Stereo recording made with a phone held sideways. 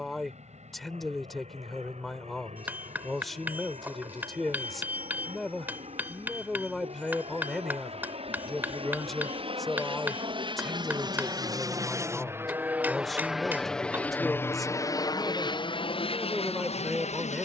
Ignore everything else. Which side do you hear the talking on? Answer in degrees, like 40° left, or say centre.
centre.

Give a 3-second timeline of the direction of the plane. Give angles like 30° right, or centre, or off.
70° right, 60° right, 60° right, 40° right, centre, 40° left.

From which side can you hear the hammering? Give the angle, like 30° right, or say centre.
10° right.